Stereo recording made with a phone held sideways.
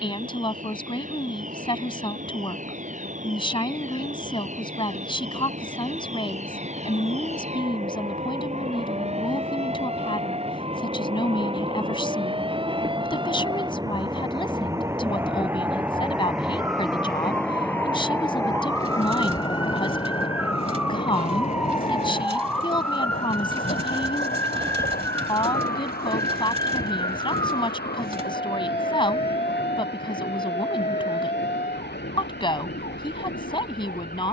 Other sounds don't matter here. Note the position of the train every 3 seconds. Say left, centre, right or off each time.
right, right, right, right, right, centre, left, left, left, left, left, left.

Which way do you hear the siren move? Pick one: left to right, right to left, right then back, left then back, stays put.
right to left.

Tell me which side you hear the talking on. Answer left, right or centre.
left.